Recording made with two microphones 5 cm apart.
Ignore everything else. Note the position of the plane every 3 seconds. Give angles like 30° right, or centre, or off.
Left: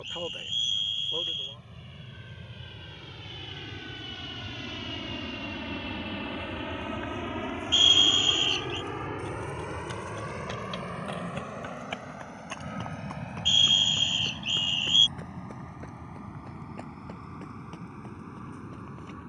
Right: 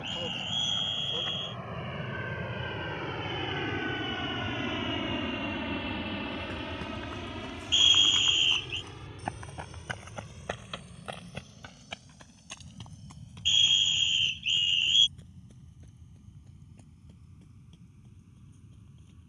60° right, 30° right, 30° left, 60° left, 70° left, 70° left, 80° left.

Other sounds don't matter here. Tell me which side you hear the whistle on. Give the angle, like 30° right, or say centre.
30° right.